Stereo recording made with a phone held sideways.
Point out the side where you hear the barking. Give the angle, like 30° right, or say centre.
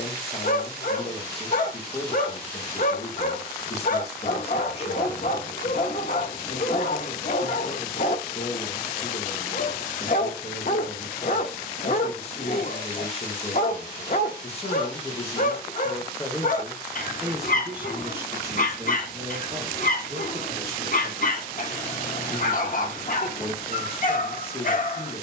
50° left.